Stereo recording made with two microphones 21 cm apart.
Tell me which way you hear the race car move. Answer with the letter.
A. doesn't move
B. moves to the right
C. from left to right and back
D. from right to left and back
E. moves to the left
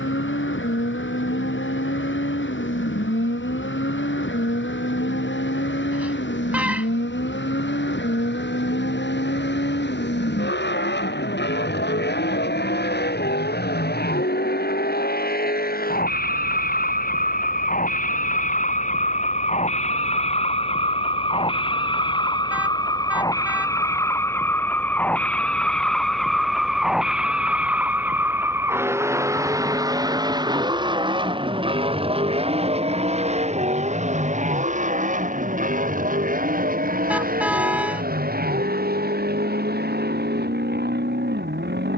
B.